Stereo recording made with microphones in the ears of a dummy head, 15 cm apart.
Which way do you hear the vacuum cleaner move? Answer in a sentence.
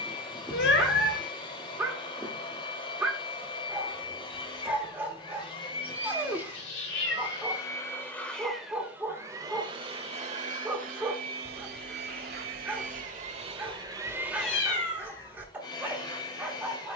You can hear the vacuum cleaner go right and come back.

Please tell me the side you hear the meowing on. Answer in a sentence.
You can hear the meowing on the left.